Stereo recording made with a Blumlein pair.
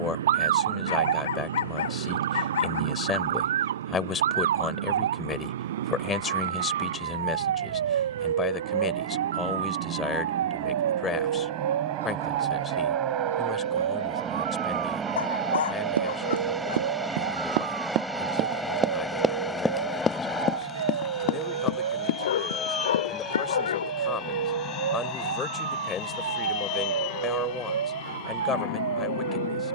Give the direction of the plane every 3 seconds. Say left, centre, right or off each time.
right, right, right, right, right, centre, centre, left, left, left.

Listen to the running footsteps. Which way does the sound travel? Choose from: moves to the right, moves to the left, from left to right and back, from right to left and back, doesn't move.
moves to the left.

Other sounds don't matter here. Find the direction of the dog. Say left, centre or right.
left.